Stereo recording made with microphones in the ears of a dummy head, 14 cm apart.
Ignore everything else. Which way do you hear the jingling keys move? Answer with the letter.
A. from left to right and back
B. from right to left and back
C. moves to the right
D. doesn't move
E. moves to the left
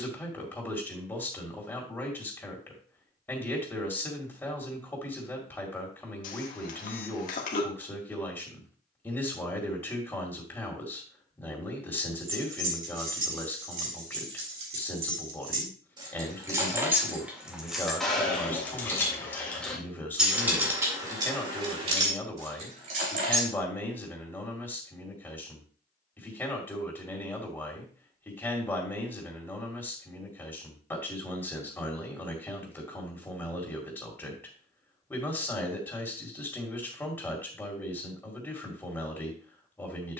B.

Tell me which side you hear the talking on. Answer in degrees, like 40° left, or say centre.
10° left.